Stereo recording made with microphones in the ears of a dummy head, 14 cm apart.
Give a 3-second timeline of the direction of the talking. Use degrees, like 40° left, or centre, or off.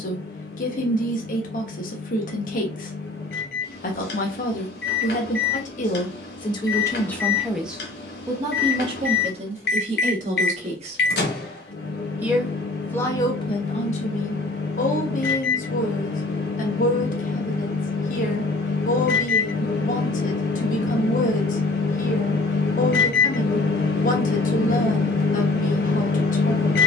50° left, 50° left, centre, 40° right, 30° left, 50° left, 50° left, 50° left, 50° left.